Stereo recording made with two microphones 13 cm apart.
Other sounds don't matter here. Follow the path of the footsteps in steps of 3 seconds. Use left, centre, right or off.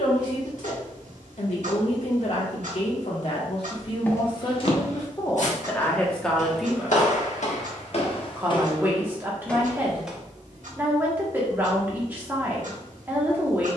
off, left, left, centre, off.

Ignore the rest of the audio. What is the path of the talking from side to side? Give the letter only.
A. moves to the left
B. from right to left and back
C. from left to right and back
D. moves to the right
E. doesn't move
D.